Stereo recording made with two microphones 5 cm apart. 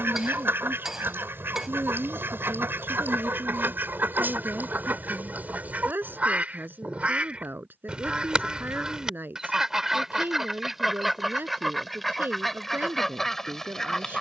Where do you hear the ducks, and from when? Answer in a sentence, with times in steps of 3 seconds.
In this clip you hear the ducks on the right from 0 s and in the centre from 9 s.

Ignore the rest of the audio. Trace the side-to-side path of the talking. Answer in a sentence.
You can hear the talking stay put.